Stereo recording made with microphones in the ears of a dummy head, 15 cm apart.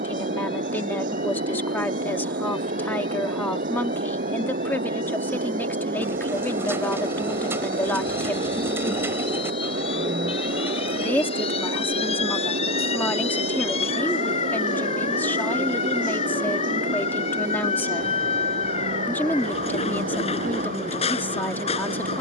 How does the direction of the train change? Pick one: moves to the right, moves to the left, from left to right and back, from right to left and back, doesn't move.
doesn't move.